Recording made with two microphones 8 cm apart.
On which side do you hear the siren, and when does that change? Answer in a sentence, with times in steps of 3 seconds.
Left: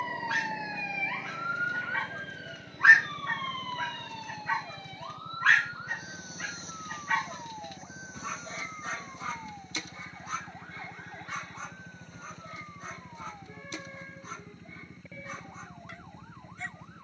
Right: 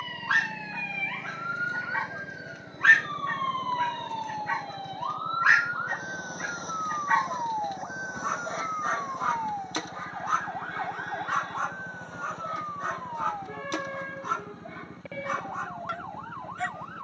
In this clip you hear the siren in the centre from 0 s and on the right from 3 s.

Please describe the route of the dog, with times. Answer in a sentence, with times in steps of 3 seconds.
You can hear the dog on the right from 0 s, in the centre from 3 s and on the right from 6 s.